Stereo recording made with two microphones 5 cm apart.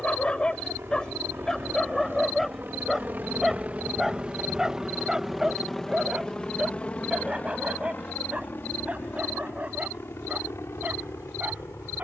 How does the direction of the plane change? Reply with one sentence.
You can hear the plane travel towards the left.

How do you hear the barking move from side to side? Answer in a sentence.
You can hear the barking move from left to right.